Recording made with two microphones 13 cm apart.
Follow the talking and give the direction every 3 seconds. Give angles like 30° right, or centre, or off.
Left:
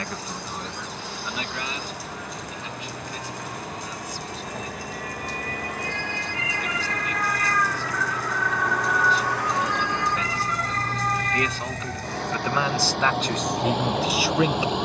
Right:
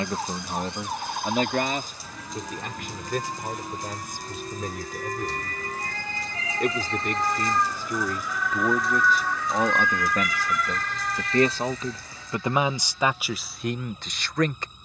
50° right, 60° right, 50° right, 40° right, 10° right.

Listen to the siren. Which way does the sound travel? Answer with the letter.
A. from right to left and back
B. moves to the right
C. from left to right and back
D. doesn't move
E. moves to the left
E.